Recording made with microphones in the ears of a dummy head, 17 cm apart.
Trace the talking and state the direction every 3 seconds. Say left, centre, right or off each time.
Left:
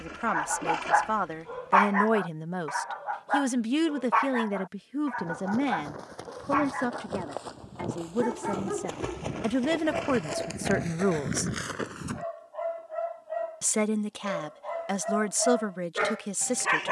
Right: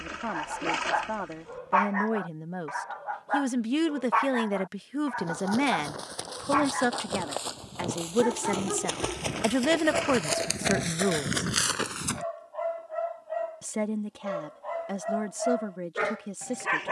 left, right, right, centre, left, left.